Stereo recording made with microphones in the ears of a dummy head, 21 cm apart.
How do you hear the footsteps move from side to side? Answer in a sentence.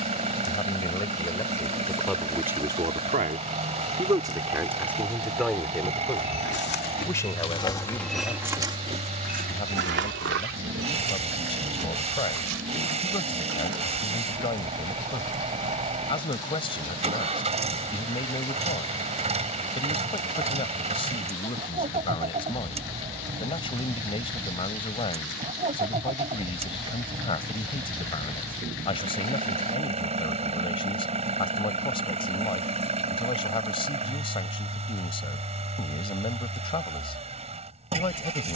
In this clip you hear the footsteps travel towards the right.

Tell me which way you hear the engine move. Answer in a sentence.
You can hear the engine stay in one place.